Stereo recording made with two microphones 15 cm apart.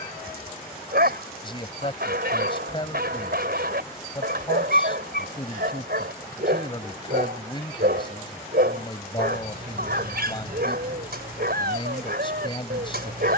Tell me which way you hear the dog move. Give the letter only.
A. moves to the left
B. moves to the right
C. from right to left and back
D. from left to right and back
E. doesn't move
E.